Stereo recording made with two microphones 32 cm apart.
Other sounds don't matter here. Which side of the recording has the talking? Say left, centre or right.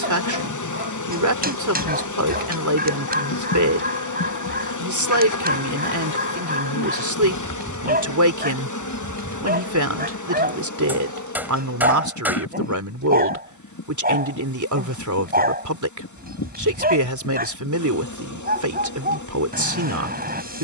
right.